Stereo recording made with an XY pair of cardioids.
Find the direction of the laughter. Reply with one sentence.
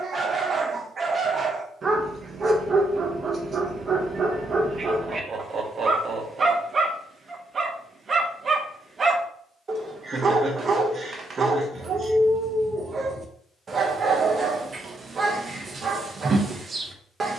In this clip you hear the laughter on the right.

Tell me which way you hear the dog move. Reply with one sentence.
In this clip you hear the dog stay put.